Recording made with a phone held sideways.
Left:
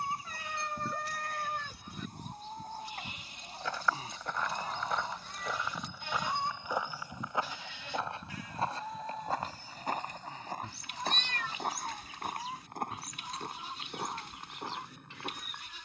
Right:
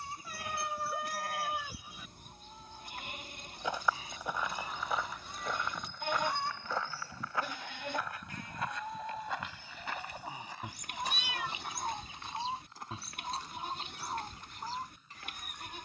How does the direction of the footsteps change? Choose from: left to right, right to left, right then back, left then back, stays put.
right to left.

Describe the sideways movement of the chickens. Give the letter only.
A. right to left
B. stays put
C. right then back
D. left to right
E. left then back
D.